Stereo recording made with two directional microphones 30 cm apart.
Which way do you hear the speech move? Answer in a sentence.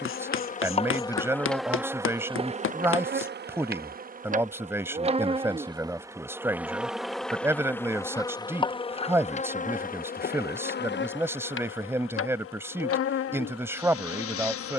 You can hear the speech stay put.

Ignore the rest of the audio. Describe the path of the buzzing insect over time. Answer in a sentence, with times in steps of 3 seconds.
You can hear the buzzing insect in the centre from 0 s, on the right from 3 s, in the centre from 6 s and on the left from 9 s.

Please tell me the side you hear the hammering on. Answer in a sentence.
You can hear the hammering on the left.